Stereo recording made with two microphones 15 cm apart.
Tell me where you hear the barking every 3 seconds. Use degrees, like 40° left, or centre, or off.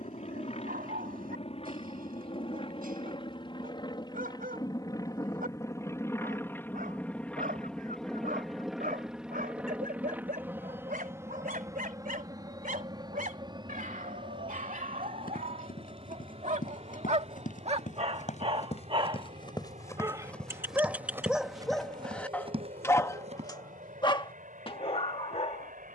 80° right, 80° right, 80° right, 70° right, 70° right, 50° right, 30° right, 10° left, 40° left.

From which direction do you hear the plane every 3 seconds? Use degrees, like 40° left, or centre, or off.
40° left, 30° left, 10° left, 10° right, 30° right, 40° right, 50° right, 50° right, 60° right.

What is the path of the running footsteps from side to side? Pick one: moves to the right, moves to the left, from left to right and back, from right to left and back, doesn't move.
moves to the right.